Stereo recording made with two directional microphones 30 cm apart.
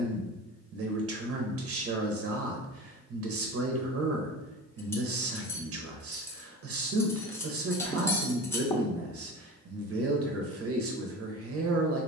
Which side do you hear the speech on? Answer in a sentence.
You can hear the speech on the right.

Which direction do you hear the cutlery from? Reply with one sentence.
You can hear the cutlery in the centre.